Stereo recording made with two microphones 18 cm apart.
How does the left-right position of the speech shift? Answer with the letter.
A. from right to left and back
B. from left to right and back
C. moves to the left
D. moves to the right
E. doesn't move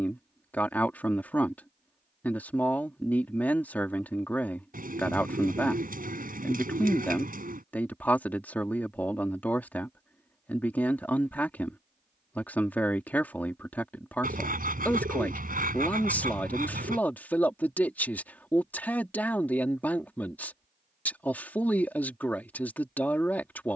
E.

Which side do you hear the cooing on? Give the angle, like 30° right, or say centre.
50° right.